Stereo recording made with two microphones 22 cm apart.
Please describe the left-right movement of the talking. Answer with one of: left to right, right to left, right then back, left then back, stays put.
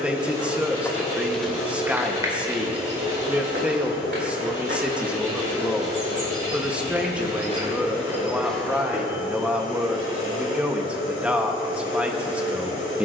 stays put.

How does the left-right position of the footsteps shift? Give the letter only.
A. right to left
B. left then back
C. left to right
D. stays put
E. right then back
E.